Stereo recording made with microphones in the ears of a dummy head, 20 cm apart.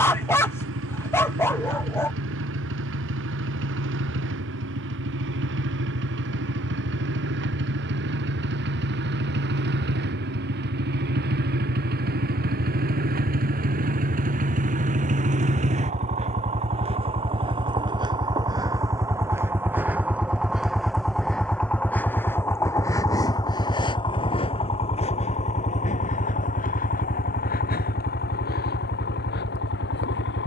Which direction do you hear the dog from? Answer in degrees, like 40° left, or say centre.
10° left.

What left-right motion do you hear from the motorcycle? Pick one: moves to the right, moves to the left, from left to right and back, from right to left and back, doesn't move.
moves to the left.